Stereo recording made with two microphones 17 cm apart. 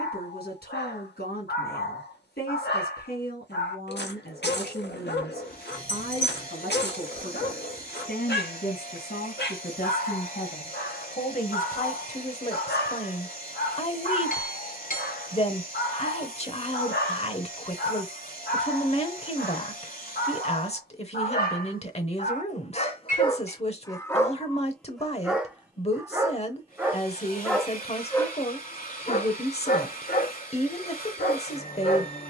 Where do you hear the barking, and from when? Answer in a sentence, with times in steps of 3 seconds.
You can hear the barking on the left from 0 s, in the centre from 24 s and on the left from 27 s.